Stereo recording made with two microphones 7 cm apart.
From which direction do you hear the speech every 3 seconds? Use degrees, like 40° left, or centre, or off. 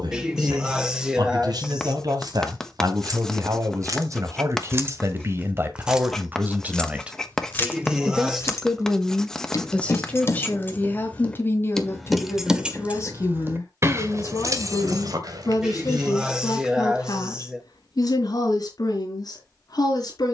60° right, 40° right, 10° right, 20° left, 40° left, 50° left, 60° left.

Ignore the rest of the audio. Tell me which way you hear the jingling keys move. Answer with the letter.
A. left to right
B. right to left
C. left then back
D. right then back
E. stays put
C.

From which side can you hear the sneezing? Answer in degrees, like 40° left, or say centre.
10° right.